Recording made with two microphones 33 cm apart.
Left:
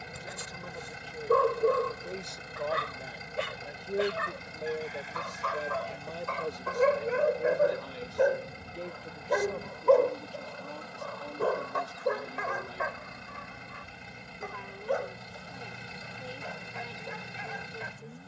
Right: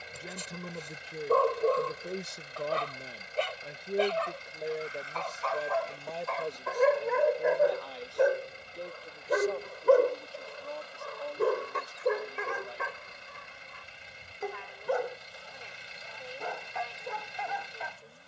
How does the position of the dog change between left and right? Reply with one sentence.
In this clip you hear the dog go from the left side to the right.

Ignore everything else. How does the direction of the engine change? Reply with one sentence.
In this clip you hear the engine stay put.